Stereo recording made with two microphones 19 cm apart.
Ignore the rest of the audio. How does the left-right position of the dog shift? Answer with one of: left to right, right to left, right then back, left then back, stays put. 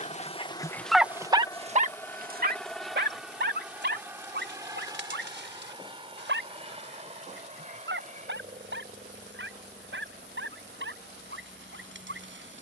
left to right.